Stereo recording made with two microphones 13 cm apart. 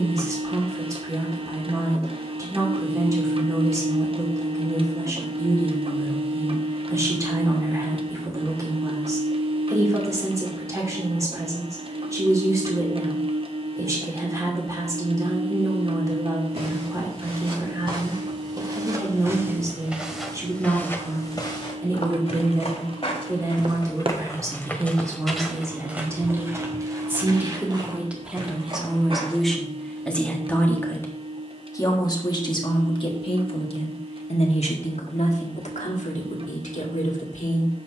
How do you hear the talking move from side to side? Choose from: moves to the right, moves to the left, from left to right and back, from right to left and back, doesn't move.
moves to the left.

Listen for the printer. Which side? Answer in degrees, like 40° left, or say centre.
40° right.